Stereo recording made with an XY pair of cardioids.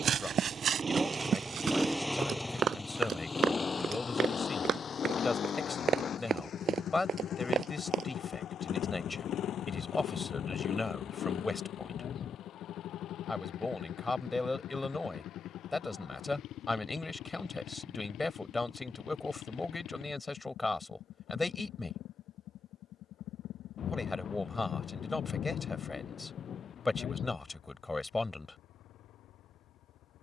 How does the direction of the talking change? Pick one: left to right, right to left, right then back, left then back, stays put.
stays put.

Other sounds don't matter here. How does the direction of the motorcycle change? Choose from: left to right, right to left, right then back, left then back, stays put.
right to left.